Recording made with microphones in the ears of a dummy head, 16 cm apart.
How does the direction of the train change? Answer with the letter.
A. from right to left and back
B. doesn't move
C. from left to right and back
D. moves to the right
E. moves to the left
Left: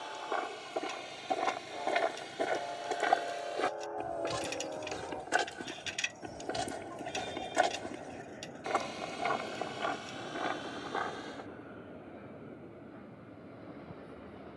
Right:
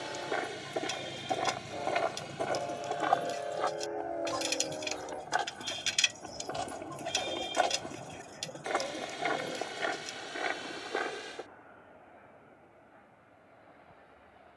E.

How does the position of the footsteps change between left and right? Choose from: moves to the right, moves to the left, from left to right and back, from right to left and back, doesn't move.
from right to left and back.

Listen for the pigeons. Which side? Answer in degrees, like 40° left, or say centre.
60° right.